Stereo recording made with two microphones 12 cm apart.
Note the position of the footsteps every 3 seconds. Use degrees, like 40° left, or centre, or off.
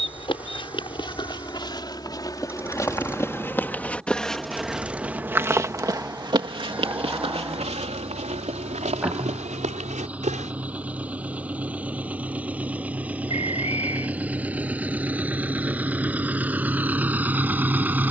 40° left, centre, 60° right, 80° right, off, off.